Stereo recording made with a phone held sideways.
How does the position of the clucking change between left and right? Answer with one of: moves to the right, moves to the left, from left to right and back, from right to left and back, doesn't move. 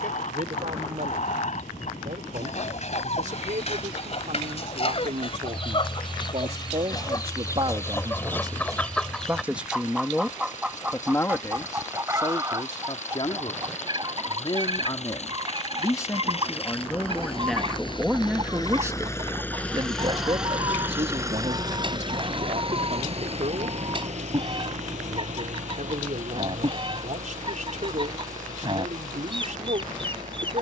moves to the right.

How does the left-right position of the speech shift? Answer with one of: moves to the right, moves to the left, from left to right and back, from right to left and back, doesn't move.
from right to left and back.